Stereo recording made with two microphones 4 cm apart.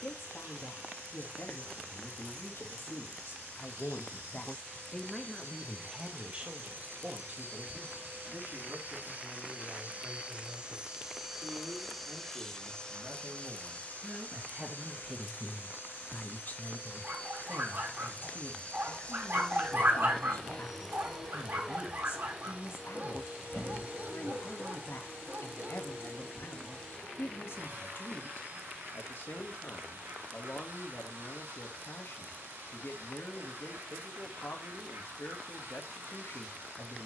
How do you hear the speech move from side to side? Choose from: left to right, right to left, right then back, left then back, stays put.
right then back.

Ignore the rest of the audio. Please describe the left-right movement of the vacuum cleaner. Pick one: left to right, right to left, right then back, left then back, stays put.
left then back.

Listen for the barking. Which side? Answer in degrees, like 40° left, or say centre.
50° right.